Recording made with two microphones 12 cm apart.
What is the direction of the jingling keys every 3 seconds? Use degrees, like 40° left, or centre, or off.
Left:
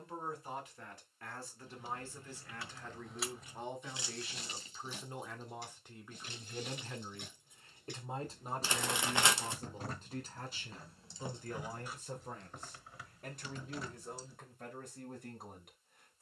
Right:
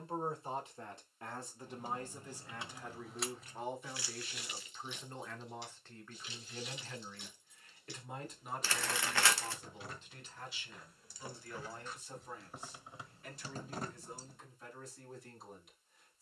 30° right, 30° left, 50° left, 30° left, 30° right, off.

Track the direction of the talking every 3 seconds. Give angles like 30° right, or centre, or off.
20° right, centre, 30° left, 50° left, 60° left, 60° left.